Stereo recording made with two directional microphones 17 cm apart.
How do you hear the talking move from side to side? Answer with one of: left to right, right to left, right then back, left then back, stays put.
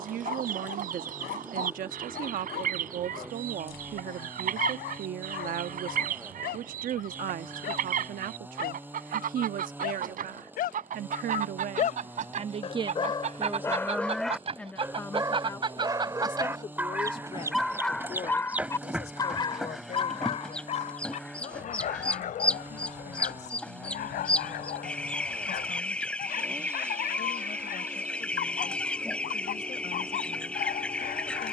right to left.